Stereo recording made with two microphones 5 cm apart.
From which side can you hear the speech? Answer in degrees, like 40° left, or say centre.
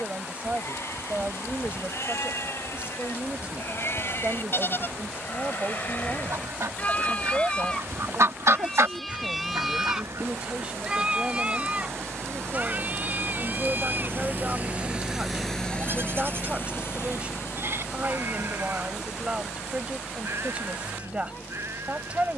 20° right.